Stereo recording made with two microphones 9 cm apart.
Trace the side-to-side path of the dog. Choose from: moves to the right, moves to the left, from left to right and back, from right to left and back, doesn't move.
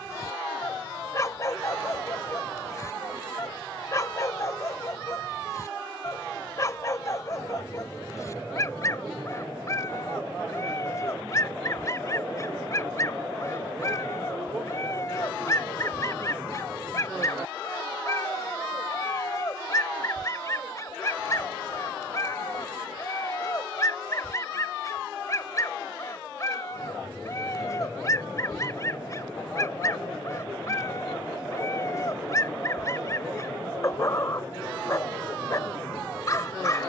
doesn't move.